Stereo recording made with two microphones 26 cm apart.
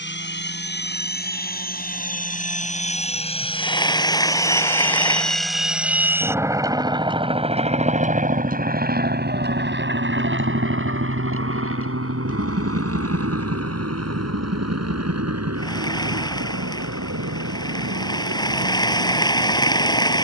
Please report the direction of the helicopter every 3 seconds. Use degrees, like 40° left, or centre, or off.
40° left, 10° left, 20° right, 40° right, 60° right, 70° right, 70° right.